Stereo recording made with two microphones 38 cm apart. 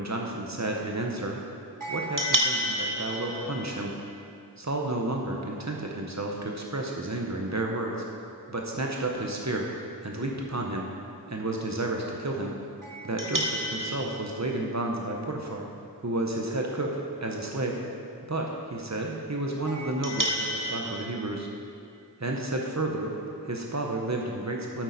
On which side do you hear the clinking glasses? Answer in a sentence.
In this clip you hear the clinking glasses on the right.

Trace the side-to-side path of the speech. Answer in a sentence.
You can hear the speech stay put.